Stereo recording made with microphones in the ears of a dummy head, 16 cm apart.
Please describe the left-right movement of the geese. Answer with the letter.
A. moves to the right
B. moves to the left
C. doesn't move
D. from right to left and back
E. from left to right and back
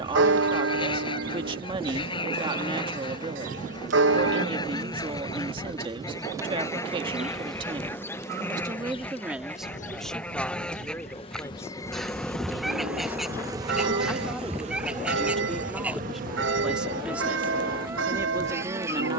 A.